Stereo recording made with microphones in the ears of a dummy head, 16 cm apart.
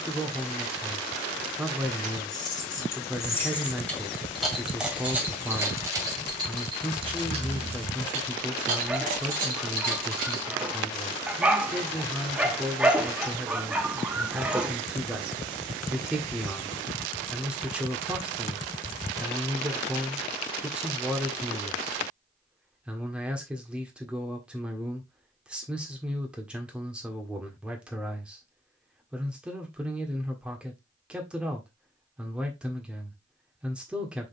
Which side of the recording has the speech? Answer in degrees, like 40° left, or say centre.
10° right.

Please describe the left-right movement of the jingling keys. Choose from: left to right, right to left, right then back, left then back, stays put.
left to right.